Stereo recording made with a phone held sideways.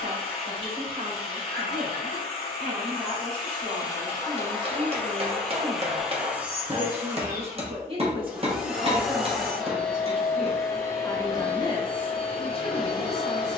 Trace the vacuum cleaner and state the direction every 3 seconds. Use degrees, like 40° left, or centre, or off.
30° left, 20° left, 10° right, 10° left, 30° left.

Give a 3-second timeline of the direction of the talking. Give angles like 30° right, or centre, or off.
70° right, 60° right, 40° right, centre, 40° left.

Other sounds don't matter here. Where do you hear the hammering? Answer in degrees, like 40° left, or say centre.
40° right.